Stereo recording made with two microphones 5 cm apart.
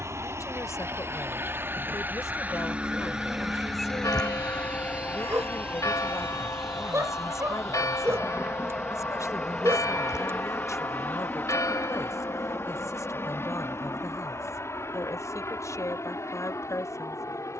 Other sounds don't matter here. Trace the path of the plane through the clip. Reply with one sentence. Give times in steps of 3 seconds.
In this clip you hear the plane on the right from 0 s, in the centre from 6 s and on the left from 9 s.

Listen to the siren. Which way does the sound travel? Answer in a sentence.
In this clip you hear the siren move from right to left.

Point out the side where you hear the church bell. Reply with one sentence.
In this clip you hear the church bell on the left.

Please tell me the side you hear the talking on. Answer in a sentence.
You can hear the talking on the left.